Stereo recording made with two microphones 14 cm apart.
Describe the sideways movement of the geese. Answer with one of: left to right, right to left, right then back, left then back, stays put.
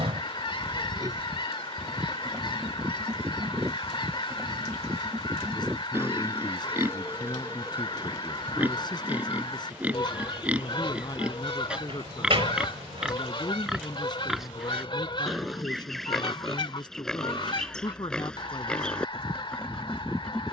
stays put.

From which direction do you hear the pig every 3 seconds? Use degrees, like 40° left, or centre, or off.
20° right, 20° right, 10° right, 10° right, centre, centre, 10° left.